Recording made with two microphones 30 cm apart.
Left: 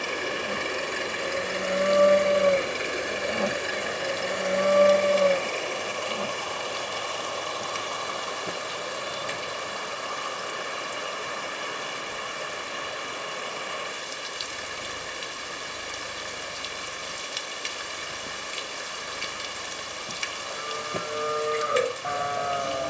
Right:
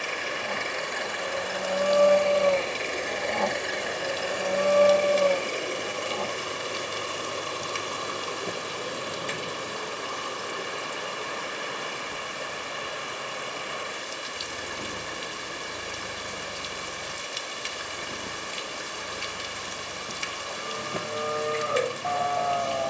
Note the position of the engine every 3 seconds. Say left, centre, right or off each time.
left, centre, right, right, right, right, right, right.